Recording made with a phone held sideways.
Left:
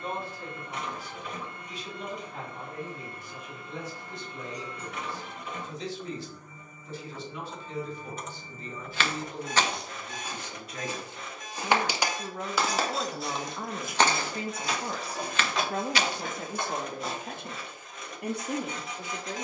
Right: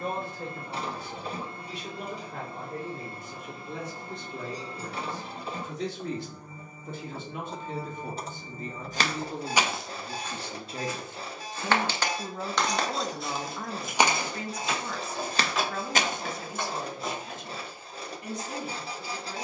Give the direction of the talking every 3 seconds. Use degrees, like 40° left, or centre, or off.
60° right, 60° right, 50° right, 30° right, 10° left, 50° left, 70° left.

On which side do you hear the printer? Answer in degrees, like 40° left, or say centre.
30° right.